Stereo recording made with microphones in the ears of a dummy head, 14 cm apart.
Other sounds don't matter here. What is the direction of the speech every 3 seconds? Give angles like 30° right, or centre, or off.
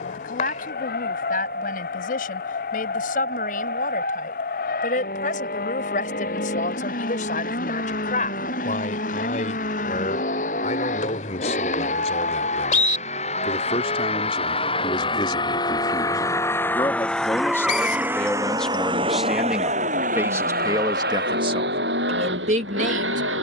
60° left, 50° left, 50° left, 50° left, 40° left, 20° left, 10° right, 40° right.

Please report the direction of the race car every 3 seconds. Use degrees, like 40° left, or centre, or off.
60° left, 60° left, 60° left, 50° left, 40° left, 20° left, 40° right, 70° right.